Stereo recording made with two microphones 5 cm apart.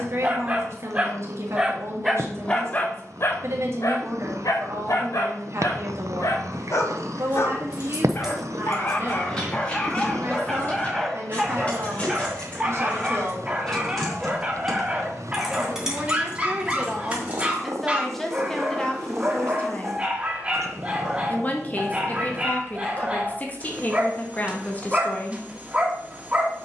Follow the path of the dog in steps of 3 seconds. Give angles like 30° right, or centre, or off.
centre, 70° left, 50° left, 10° left, 20° right, 20° right, 20° right, 20° right, 20° right.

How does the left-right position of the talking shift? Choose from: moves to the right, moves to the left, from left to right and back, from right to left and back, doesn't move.
moves to the left.